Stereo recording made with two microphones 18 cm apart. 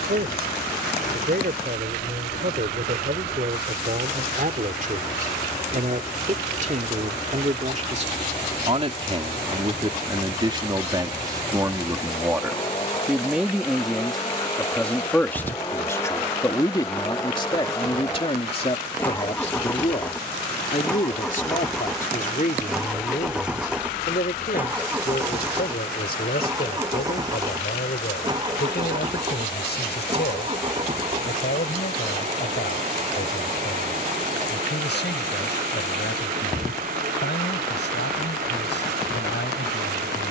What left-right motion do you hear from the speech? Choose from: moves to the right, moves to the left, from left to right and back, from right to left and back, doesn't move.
moves to the left.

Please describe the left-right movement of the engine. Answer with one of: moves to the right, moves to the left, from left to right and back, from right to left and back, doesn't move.
moves to the right.